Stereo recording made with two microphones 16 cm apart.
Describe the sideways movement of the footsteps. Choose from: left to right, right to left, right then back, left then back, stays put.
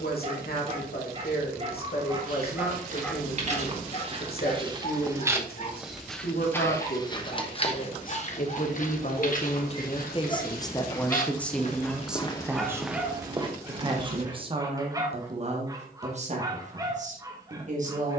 left then back.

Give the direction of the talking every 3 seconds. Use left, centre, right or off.
left, left, left, left, right, right.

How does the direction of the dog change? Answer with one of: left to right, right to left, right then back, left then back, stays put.
left then back.